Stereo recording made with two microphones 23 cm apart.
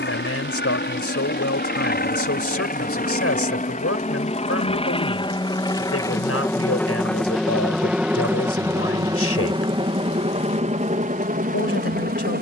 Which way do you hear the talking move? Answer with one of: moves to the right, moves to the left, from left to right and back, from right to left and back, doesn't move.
doesn't move.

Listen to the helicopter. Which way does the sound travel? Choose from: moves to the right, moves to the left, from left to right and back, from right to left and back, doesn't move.
moves to the right.